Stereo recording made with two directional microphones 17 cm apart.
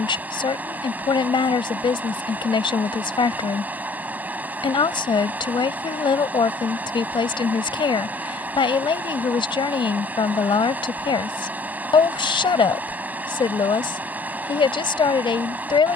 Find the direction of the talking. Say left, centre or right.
left.